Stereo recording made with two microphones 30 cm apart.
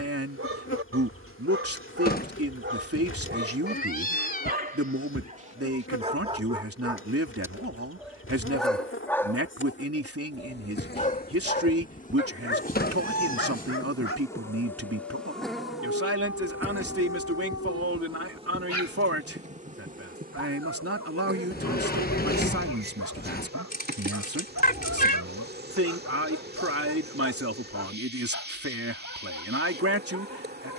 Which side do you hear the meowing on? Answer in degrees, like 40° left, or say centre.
30° left.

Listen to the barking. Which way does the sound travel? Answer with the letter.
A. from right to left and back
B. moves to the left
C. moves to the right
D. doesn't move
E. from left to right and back
B.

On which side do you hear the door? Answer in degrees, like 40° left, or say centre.
30° left.